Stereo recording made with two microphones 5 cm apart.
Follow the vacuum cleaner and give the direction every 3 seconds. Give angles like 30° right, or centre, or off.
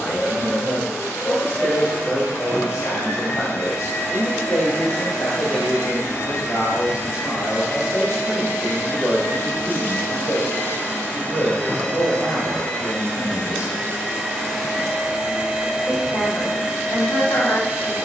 60° left, 60° left, 50° left, 30° left, 10° left, 10° right.